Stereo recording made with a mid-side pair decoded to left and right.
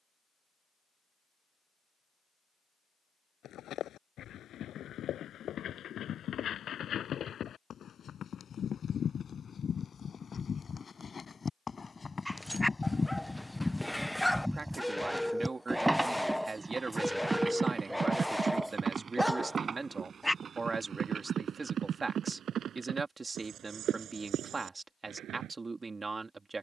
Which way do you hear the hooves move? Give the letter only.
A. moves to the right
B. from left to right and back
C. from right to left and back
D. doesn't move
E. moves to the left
A.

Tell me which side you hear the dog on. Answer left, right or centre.
centre.